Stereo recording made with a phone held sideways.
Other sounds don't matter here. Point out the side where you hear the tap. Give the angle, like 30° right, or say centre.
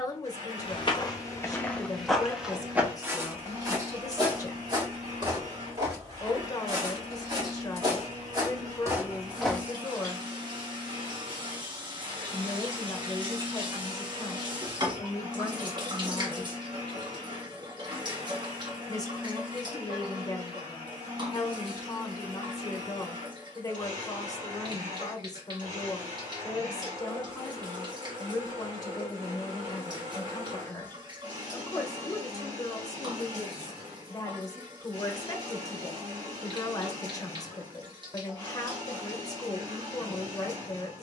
30° right.